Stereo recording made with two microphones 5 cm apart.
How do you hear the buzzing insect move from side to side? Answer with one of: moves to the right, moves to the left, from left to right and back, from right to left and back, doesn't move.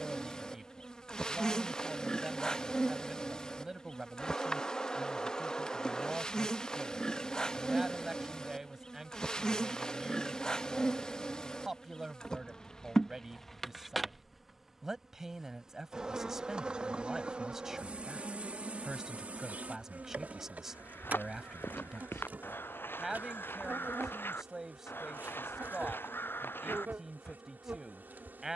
moves to the right.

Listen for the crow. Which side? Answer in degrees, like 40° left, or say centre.
50° left.